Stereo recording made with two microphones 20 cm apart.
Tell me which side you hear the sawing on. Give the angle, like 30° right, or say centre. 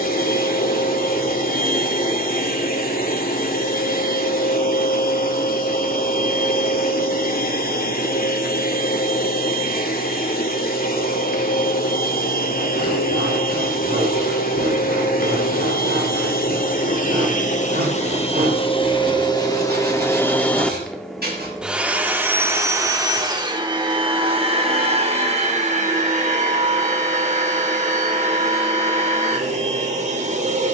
50° right.